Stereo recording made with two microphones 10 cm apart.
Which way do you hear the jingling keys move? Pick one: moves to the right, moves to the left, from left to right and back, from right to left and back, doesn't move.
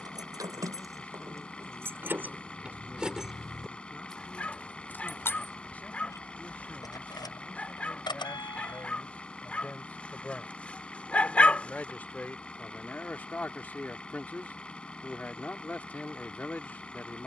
moves to the left.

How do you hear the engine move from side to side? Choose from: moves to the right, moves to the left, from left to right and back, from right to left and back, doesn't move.
doesn't move.